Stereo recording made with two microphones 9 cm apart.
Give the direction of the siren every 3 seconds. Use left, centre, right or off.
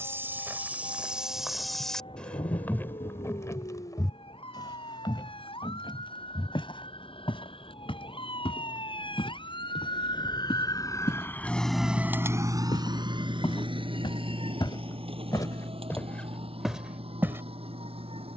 left, left, left, left, right, right.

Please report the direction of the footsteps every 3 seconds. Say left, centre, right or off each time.
centre, left, left, left, left, centre.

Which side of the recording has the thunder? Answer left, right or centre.
left.